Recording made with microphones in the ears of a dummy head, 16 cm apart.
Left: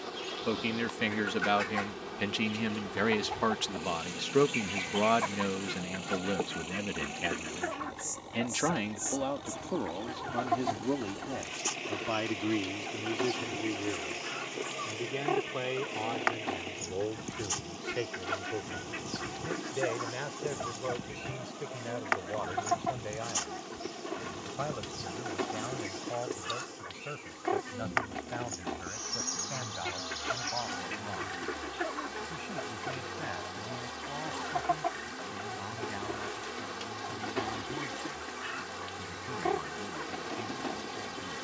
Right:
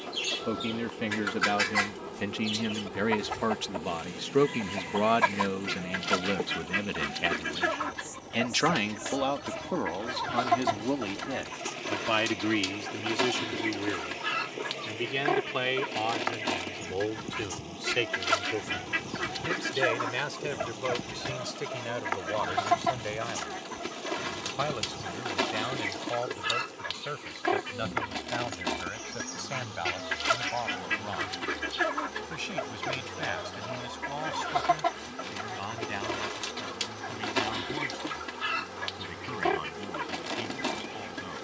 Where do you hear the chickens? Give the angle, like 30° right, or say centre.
80° right.